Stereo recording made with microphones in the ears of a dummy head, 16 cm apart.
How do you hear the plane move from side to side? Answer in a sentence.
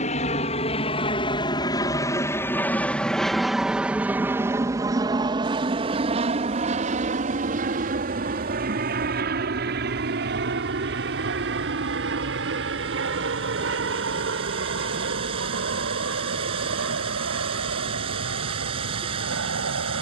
In this clip you hear the plane move to the right.